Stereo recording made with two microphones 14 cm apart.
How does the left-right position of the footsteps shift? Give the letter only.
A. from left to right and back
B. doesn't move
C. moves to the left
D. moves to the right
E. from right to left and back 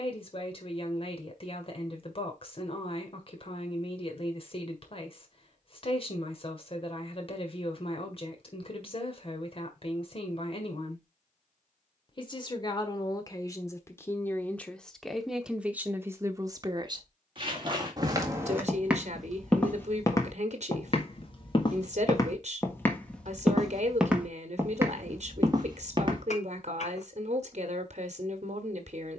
E.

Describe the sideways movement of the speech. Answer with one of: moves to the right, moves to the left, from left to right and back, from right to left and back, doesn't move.
moves to the right.